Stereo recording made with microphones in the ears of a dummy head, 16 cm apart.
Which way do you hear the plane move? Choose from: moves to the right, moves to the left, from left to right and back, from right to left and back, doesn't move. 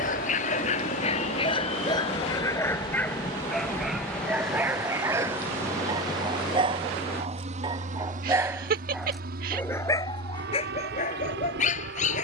moves to the right.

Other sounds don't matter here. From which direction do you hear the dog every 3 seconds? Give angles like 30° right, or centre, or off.
30° left, 10° right, 20° right, 30° left.